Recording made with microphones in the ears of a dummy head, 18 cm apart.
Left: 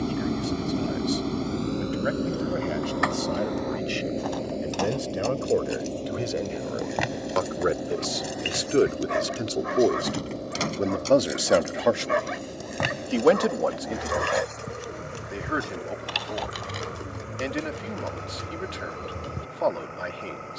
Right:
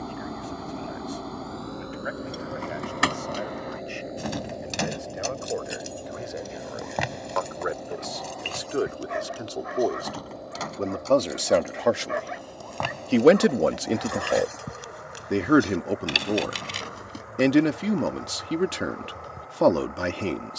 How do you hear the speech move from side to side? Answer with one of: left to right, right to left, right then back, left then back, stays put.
left to right.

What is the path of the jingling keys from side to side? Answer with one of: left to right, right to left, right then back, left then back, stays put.
left then back.